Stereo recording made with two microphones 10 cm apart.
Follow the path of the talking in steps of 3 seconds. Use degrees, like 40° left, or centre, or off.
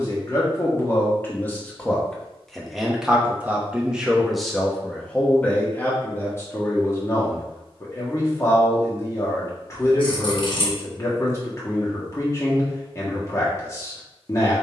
20° left, centre, 30° left, 30° left, 30° left.